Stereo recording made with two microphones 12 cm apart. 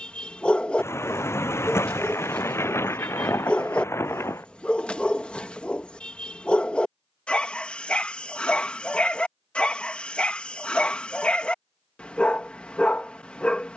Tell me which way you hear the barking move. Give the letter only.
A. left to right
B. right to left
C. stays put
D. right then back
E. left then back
C.